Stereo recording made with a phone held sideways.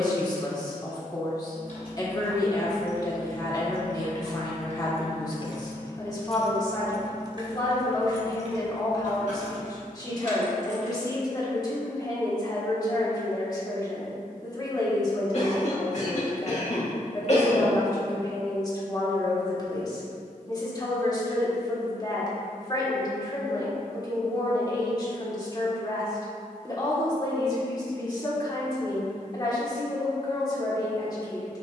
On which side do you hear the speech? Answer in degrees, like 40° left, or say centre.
30° left.